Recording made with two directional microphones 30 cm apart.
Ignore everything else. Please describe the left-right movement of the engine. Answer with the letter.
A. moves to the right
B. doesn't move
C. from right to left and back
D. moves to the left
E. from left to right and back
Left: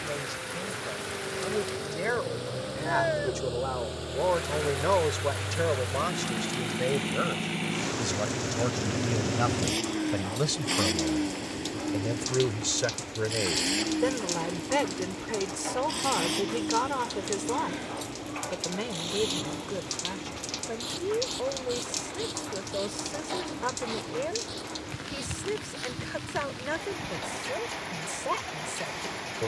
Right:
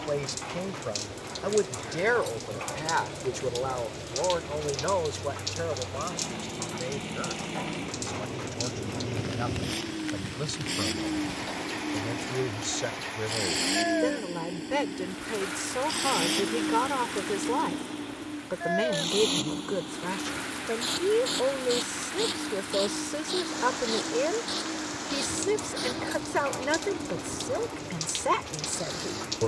A.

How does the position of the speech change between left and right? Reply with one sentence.
You can hear the speech move from right to left and back again.